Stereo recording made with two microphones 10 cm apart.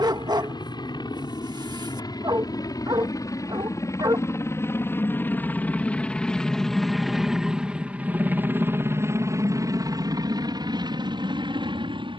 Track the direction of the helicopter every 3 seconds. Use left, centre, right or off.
left, left, centre, right.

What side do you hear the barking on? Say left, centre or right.
right.